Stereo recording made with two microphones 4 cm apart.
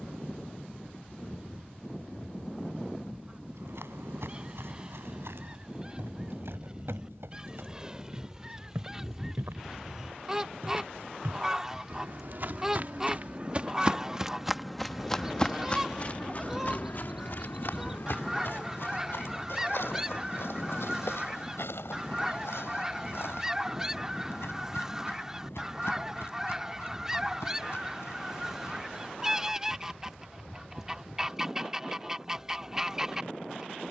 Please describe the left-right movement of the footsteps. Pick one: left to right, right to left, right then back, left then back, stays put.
right to left.